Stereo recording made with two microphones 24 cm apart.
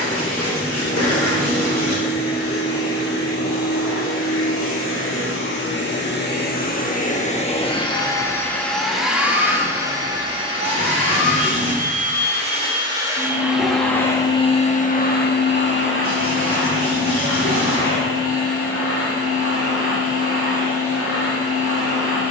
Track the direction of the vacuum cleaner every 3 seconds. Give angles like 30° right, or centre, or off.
70° left, 60° left, 20° left, 20° right, centre, 60° left, 70° left, 70° left.